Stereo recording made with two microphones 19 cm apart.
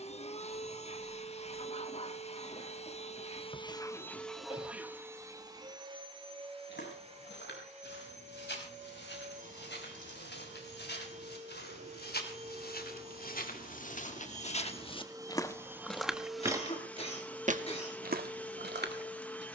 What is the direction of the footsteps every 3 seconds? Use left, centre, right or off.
off, off, left, left, left, centre, right.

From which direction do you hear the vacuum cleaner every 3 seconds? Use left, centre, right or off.
left, centre, right, right, right, centre, centre.